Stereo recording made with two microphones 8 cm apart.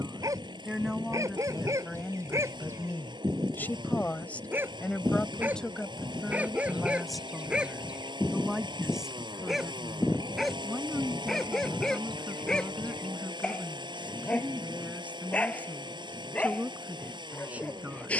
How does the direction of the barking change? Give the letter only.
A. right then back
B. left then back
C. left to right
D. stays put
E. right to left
E.